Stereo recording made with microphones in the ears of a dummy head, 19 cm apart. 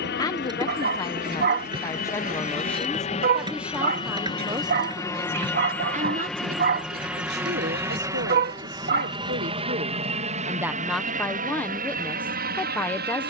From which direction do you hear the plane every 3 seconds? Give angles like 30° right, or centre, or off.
40° left, 20° left, 10° right, 30° right, 40° right.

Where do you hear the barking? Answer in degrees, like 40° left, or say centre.
40° right.